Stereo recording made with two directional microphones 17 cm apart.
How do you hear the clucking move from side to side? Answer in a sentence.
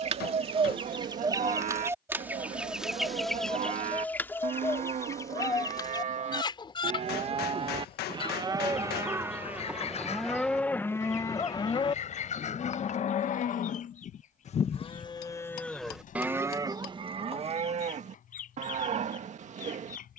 In this clip you hear the clucking go from the right side to the left.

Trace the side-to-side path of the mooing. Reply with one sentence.
In this clip you hear the mooing go left and come back.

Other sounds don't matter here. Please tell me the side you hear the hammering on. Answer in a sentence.
In this clip you hear the hammering on the left.